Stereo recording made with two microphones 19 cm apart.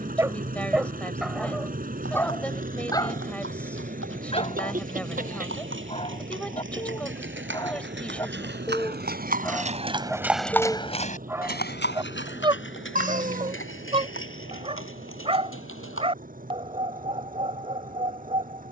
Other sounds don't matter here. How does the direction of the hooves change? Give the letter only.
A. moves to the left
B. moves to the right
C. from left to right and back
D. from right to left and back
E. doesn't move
A.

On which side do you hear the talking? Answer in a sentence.
You can hear the talking in the centre.